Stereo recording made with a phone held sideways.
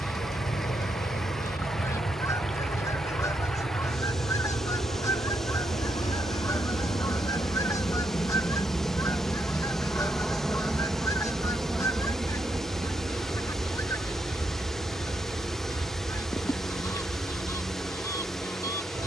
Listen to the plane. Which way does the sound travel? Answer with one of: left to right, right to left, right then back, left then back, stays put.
left to right.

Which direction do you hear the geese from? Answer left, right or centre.
left.